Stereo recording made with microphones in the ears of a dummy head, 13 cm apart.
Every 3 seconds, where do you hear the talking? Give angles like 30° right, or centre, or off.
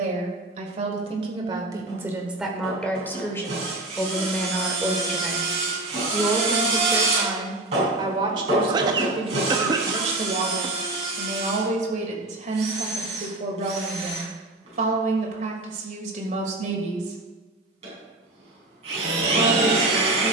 30° right, 10° left, 20° right, 50° right, 50° right, 50° right, 50° right.